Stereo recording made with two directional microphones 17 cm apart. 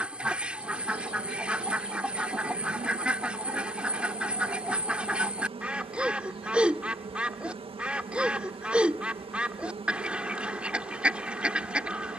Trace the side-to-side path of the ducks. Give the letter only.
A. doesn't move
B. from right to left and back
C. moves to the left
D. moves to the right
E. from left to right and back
A.